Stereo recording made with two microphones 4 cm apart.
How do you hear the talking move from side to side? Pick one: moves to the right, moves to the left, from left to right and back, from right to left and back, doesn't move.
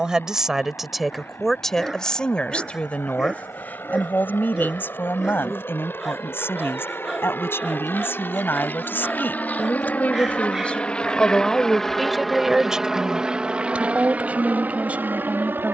from right to left and back.